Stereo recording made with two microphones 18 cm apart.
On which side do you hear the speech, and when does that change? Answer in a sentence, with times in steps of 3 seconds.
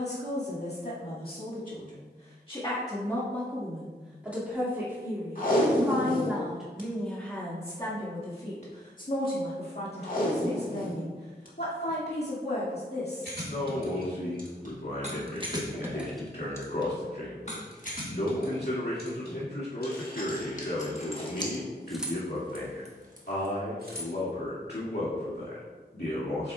In this clip you hear the speech on the left from 0 s, in the centre from 3 s and on the left from 9 s.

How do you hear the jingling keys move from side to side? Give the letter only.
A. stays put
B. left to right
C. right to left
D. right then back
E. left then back
E.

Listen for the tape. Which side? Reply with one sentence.
In this clip you hear the tape on the left.